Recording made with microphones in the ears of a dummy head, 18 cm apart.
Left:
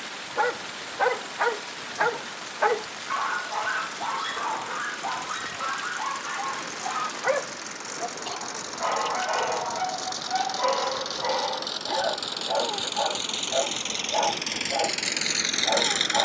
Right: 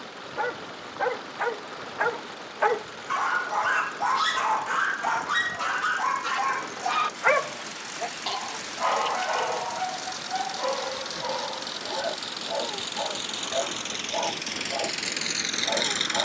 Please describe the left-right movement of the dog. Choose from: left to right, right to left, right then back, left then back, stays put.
right then back.